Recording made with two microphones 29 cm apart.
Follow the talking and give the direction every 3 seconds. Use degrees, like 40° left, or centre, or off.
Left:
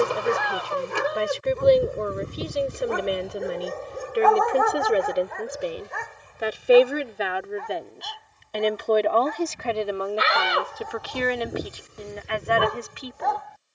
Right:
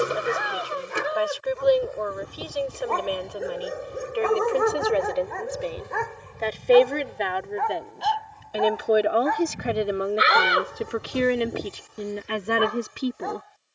30° left, 20° left, centre, 20° right, 40° right.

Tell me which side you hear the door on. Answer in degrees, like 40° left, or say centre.
20° right.